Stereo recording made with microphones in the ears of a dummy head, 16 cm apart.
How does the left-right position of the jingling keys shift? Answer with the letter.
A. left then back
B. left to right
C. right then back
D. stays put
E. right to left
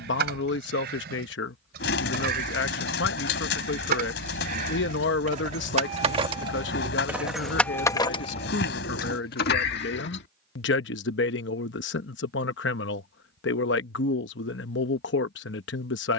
E.